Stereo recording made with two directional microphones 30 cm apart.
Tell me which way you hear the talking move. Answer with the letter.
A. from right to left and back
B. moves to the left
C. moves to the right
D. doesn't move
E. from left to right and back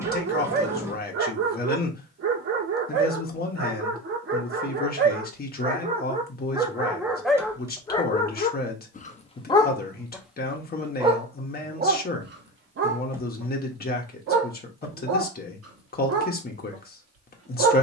D.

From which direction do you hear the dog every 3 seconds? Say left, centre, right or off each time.
right, right, centre, centre, right, right.